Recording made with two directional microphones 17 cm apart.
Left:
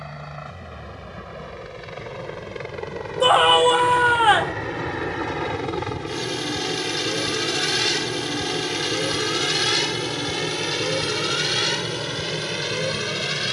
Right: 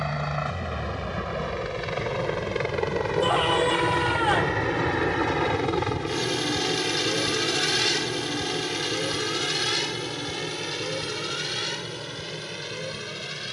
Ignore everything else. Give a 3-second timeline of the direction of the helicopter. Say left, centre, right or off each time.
right, right, centre, left, left.